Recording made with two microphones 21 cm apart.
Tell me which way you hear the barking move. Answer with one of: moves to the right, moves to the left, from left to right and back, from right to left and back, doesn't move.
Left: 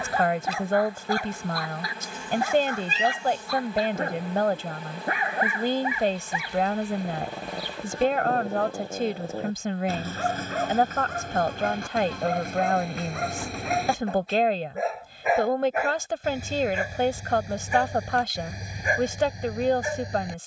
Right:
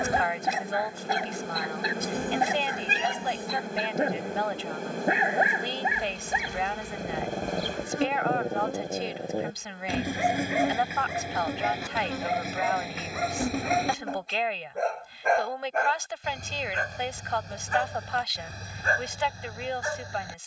moves to the left.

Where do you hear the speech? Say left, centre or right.
left.